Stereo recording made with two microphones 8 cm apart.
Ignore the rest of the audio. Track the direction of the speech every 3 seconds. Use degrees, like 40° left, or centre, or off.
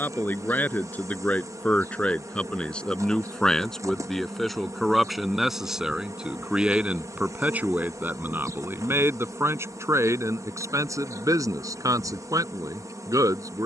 20° left, centre, 20° right, 40° right, 50° right.